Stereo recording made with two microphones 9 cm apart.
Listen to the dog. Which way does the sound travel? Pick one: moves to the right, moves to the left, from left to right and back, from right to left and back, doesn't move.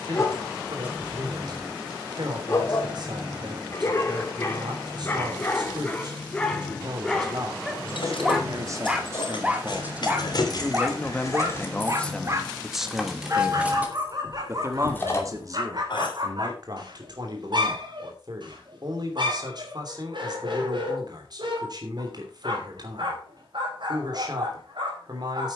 moves to the right.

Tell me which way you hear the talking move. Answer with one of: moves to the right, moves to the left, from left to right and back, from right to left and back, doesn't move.
from right to left and back.